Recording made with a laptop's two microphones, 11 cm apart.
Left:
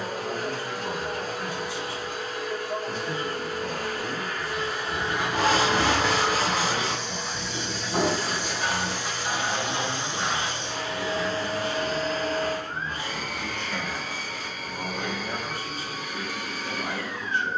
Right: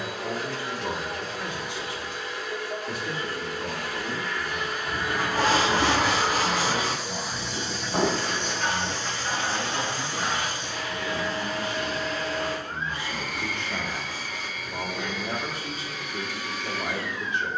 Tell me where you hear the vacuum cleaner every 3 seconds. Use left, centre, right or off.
left, left, centre, left, left, left.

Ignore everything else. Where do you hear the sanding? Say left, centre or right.
centre.